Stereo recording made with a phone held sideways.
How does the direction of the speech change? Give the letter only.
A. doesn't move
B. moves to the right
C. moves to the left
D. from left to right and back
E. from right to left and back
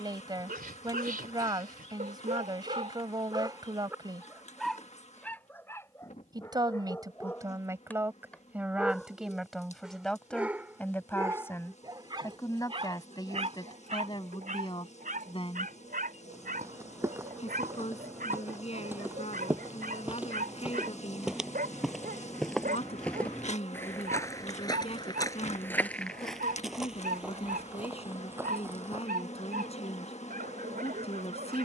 C.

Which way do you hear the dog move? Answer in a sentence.
In this clip you hear the dog move from right to left and back again.